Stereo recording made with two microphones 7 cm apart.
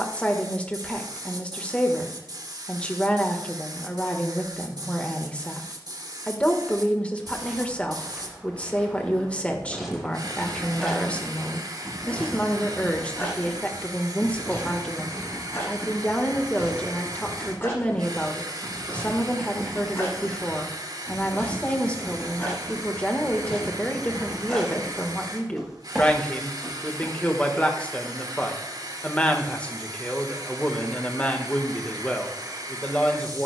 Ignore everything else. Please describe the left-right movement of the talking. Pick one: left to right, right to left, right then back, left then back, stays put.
stays put.